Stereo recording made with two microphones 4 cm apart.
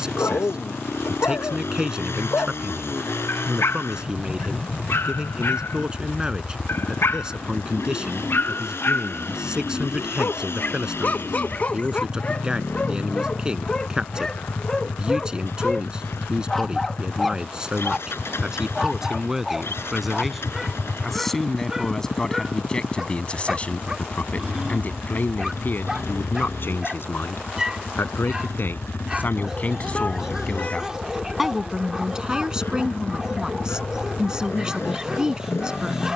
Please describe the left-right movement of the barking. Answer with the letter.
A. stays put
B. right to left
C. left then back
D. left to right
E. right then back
D.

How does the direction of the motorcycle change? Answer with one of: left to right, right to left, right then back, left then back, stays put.
stays put.